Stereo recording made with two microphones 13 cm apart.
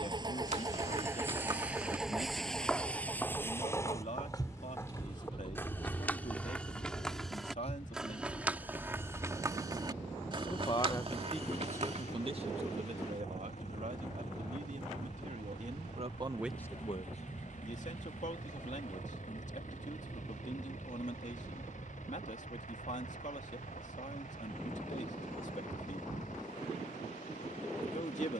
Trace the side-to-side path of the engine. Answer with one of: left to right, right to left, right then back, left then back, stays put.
right to left.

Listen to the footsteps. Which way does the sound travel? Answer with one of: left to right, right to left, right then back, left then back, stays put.
left then back.